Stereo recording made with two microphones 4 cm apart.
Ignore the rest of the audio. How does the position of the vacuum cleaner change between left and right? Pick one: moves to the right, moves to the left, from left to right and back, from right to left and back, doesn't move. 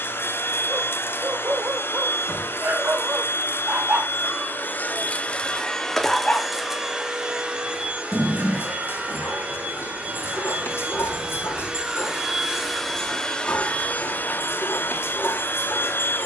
from left to right and back.